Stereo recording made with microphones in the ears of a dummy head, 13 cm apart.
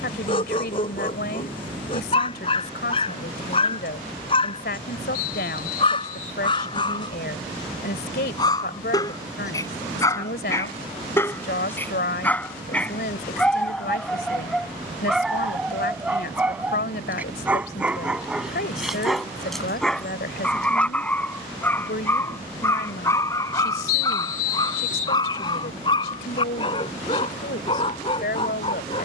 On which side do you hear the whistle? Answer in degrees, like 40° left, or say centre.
60° left.